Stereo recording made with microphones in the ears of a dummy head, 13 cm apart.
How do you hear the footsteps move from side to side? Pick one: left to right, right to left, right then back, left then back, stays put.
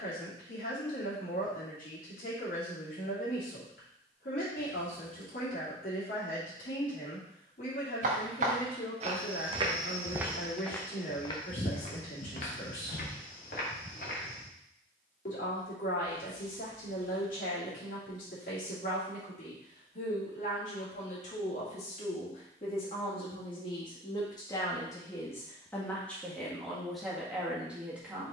right to left.